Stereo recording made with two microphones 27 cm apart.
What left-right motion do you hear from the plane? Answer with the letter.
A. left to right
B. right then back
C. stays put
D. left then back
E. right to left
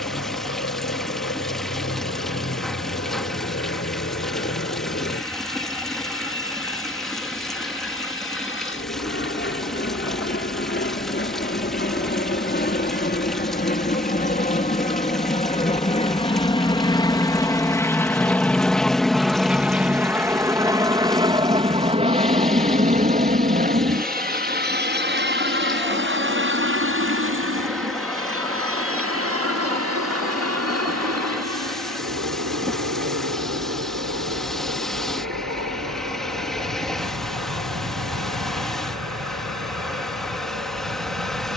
A.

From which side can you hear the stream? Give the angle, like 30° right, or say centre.
centre.